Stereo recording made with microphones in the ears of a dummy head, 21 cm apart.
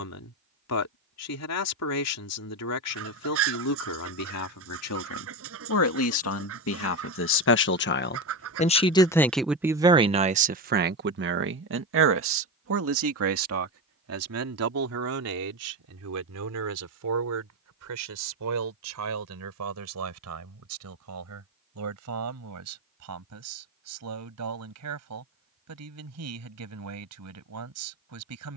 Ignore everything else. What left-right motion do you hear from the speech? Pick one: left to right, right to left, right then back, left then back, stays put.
left to right.